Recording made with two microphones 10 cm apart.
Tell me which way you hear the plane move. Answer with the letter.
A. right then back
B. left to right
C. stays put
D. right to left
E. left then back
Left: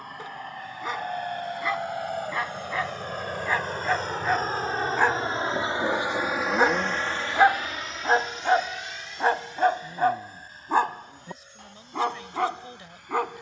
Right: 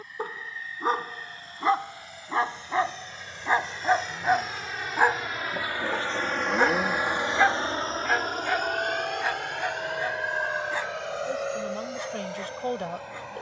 B.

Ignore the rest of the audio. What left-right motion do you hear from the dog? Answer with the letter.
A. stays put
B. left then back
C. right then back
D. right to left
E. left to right
D.